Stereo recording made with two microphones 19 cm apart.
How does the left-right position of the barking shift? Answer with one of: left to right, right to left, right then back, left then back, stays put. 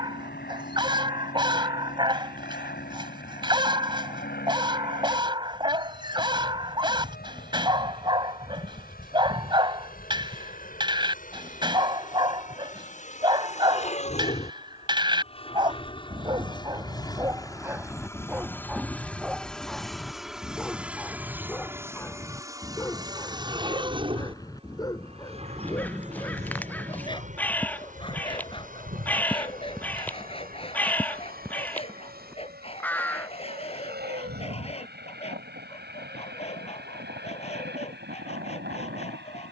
right to left.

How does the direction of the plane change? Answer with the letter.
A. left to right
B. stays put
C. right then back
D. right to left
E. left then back
A.